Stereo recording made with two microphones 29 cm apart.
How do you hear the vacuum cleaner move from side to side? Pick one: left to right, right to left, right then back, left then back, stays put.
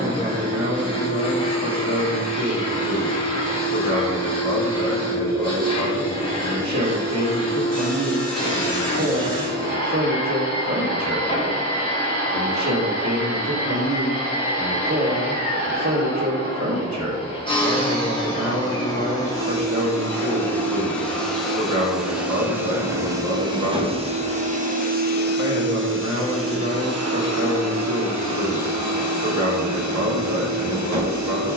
left to right.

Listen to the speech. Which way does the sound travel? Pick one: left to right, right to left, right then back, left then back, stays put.
stays put.